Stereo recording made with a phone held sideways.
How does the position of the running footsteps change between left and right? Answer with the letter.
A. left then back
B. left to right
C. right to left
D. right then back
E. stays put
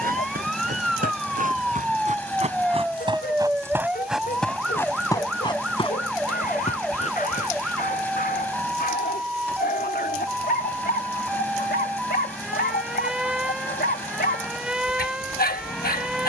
C.